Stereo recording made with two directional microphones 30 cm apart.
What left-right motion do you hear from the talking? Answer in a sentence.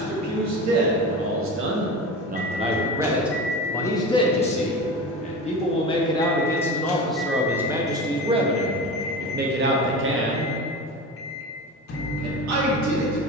In this clip you hear the talking go left and come back.